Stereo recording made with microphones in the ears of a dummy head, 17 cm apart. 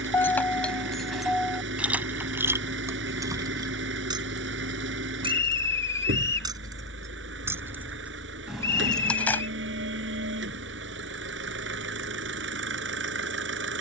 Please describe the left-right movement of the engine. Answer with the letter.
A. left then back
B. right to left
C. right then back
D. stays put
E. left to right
D.